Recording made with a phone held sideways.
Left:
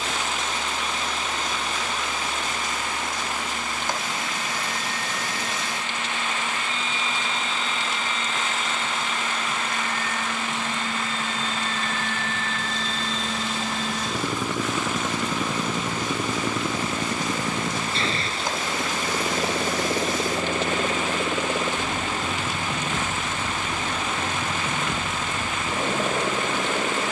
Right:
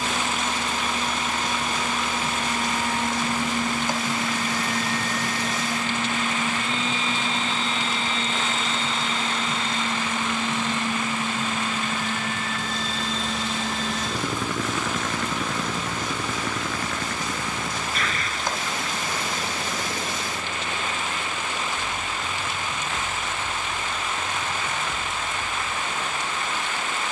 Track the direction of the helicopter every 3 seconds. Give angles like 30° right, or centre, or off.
50° right, 40° right, 30° right, 20° right, centre, 20° left, 30° left, 40° left, 50° left.